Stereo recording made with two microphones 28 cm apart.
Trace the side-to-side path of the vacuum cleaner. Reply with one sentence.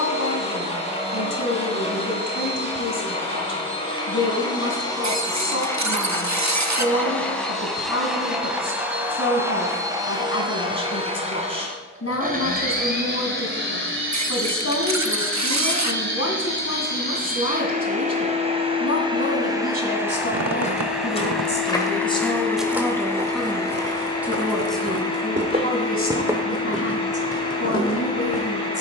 You can hear the vacuum cleaner go right and come back.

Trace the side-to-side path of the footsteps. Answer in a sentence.
You can hear the footsteps go right and come back.